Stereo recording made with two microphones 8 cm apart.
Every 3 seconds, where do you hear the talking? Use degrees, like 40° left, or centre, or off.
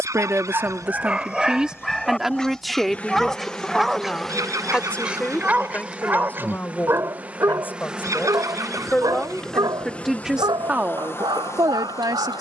10° right, 10° left, 20° left, 10° right.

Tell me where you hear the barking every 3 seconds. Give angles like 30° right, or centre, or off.
10° right, 10° right, 30° right, 60° right.